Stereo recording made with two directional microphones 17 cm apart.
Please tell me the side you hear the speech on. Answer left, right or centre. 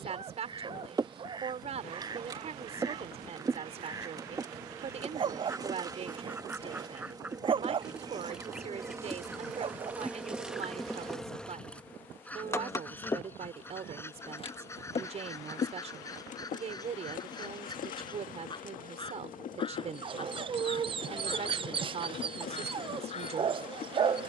right.